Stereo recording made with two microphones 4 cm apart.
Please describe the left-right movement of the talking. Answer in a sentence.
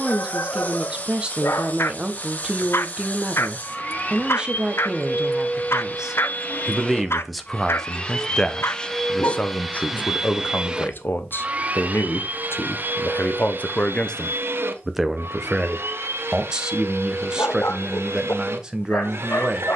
In this clip you hear the talking go left and come back.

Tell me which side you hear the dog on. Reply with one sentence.
In this clip you hear the dog on the left.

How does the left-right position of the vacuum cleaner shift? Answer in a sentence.
You can hear the vacuum cleaner move to the right.